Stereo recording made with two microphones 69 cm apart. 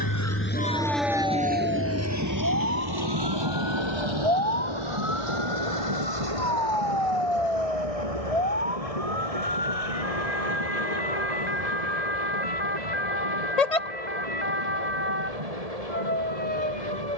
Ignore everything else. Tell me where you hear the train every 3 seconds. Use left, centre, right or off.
centre, right, right, right, right, right.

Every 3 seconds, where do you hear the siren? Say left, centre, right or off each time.
right, centre, left, left, left, left.